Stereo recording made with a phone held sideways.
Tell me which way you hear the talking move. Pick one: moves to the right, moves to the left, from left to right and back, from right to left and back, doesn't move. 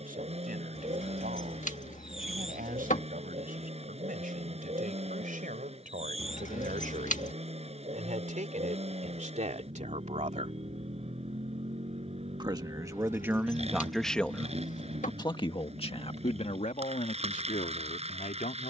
moves to the left.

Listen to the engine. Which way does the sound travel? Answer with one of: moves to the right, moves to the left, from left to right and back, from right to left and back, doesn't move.
doesn't move.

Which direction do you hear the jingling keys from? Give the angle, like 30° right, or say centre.
60° left.